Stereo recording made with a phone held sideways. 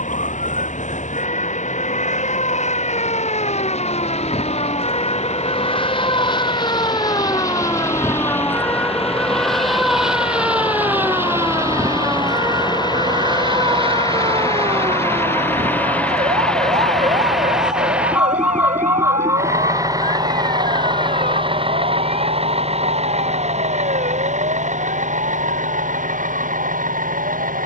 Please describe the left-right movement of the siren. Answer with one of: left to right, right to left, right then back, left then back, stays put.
left to right.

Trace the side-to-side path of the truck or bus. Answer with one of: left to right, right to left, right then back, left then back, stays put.
left to right.